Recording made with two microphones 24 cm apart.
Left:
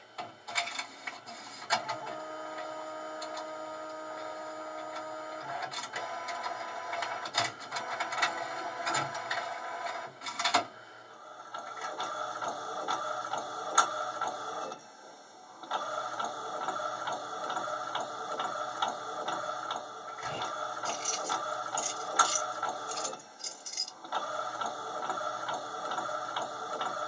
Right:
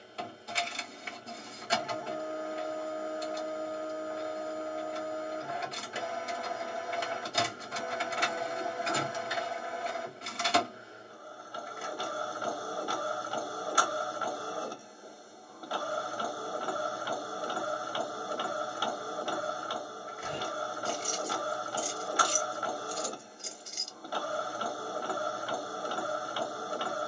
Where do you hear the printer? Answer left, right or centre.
right.